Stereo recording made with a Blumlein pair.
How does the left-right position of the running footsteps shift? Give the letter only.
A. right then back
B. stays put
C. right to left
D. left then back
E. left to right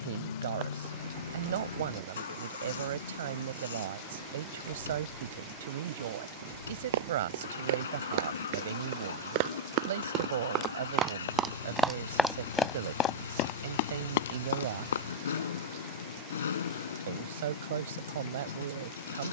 C.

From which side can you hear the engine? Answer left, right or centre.
left.